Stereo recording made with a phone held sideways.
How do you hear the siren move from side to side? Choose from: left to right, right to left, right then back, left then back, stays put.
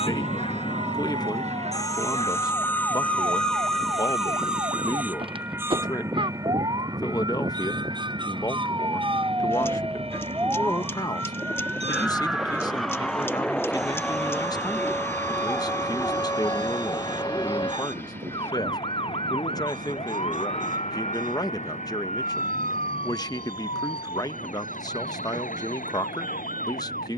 right to left.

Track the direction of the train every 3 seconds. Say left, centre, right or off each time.
left, centre, right, right, right, right, right, right, right.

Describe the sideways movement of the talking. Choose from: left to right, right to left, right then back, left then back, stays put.
stays put.